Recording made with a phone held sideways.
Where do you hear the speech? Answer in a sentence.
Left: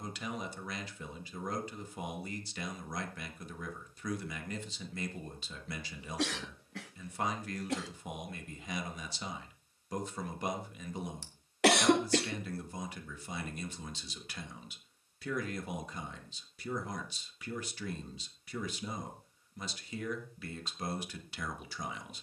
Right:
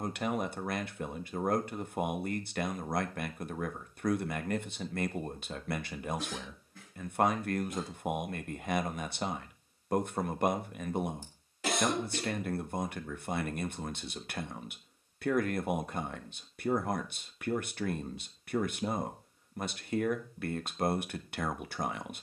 In this clip you hear the speech on the right.